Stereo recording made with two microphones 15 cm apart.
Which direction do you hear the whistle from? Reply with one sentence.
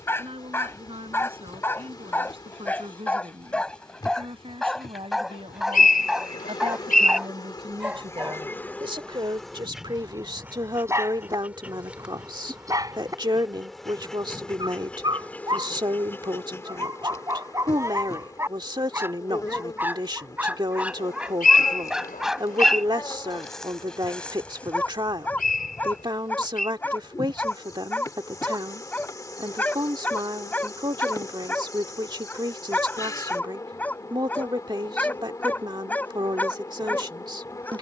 In this clip you hear the whistle on the left.